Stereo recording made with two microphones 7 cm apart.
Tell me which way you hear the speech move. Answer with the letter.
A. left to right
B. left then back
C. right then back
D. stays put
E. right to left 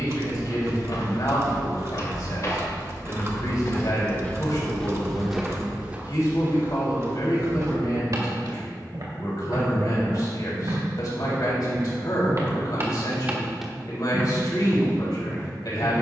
D.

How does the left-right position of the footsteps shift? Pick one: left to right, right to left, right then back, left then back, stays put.
right then back.